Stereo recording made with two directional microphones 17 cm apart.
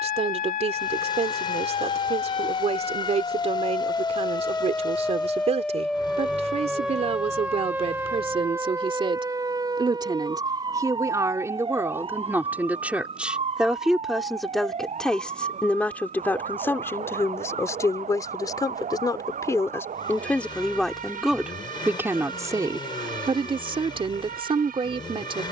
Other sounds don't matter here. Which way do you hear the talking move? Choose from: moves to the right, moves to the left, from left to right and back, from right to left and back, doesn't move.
from right to left and back.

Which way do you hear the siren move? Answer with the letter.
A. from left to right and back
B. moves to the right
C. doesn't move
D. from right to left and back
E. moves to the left
B.